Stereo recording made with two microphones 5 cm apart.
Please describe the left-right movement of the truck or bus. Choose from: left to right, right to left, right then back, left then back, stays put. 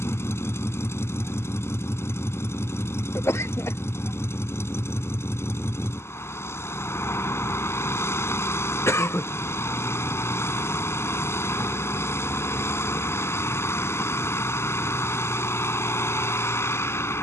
stays put.